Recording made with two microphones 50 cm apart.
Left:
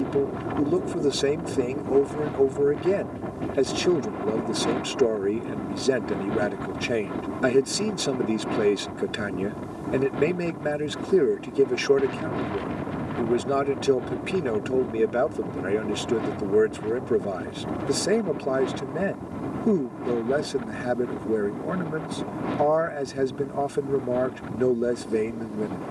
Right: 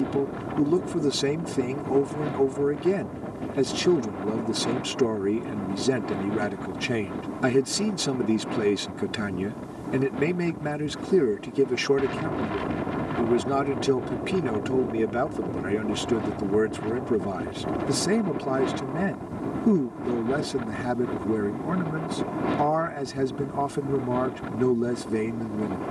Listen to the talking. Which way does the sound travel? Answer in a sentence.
In this clip you hear the talking stay in one place.